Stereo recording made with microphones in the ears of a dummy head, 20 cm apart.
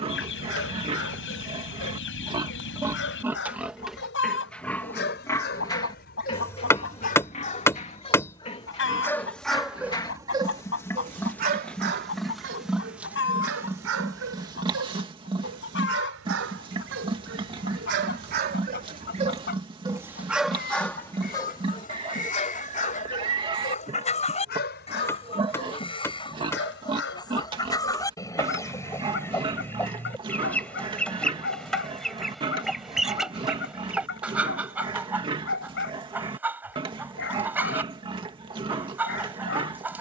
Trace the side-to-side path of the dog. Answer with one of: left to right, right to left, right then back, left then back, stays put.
right then back.